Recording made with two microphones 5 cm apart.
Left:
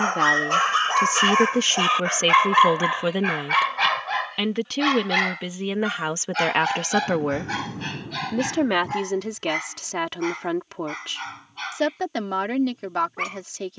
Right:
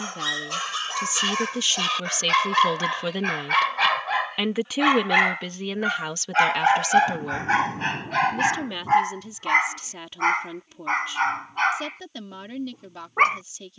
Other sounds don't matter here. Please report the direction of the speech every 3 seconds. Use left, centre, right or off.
left, centre, left, left, left.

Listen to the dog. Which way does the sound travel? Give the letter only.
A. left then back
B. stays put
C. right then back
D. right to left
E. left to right
E.